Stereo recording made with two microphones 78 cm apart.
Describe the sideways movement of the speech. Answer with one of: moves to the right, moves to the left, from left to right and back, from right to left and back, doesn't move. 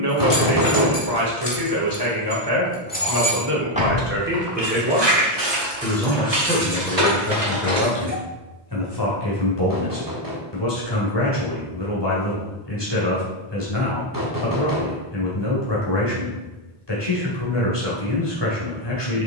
moves to the left.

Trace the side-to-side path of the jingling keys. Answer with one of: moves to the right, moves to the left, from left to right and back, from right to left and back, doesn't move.
moves to the right.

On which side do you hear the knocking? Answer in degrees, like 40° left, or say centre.
30° right.